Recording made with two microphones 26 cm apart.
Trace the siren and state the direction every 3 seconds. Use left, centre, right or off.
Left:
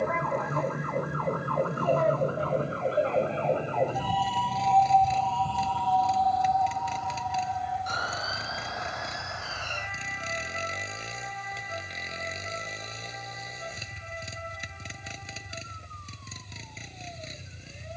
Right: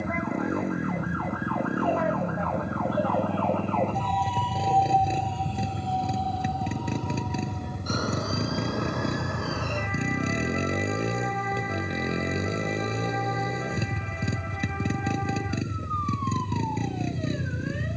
left, centre, right, right, right, right.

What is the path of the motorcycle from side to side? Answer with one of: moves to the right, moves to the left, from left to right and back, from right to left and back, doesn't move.
doesn't move.